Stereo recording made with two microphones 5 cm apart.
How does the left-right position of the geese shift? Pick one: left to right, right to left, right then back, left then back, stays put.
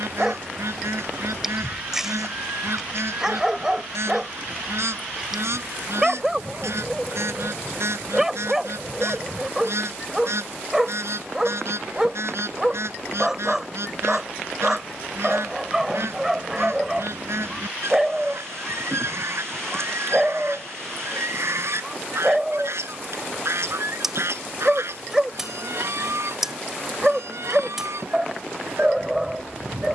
stays put.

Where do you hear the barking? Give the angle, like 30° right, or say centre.
10° right.